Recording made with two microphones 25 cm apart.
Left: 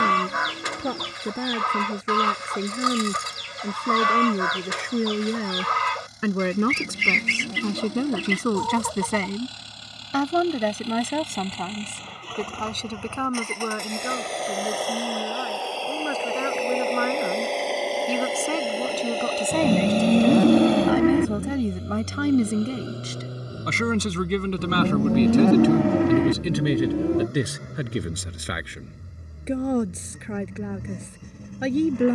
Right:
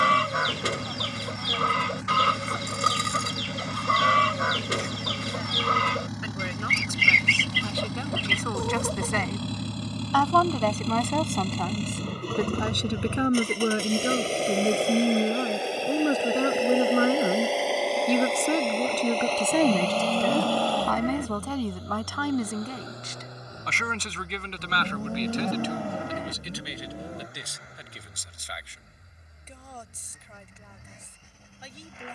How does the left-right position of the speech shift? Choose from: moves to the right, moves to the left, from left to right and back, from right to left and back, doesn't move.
from left to right and back.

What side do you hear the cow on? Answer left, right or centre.
left.